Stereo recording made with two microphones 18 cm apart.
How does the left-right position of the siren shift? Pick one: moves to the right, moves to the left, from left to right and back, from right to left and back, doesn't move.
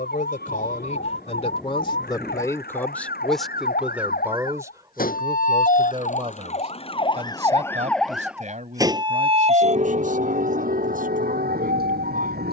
moves to the right.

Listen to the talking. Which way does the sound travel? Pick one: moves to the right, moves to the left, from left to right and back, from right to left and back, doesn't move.
moves to the right.